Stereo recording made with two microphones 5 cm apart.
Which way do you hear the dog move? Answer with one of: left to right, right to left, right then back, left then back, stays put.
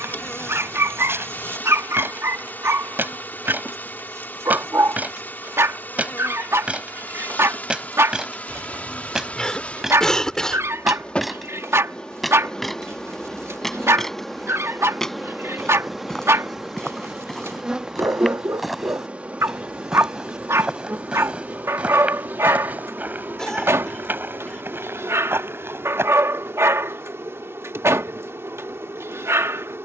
stays put.